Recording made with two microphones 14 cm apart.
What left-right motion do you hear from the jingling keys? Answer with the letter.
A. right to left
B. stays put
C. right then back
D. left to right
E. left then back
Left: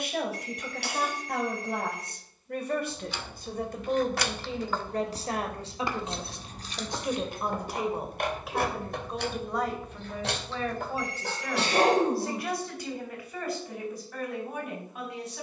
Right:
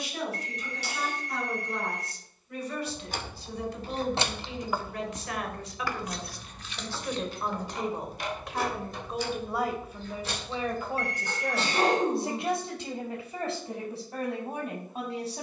A.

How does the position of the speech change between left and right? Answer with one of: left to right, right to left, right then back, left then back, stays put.
left to right.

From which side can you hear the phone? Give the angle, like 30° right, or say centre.
60° right.